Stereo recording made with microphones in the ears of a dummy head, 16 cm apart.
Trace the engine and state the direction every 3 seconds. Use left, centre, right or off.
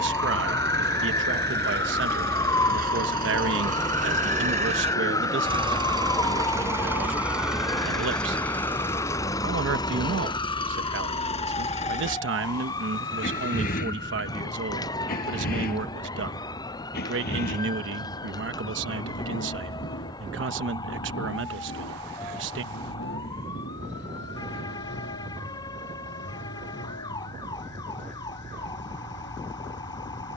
right, right, centre, left, left, left, left, left, left, left.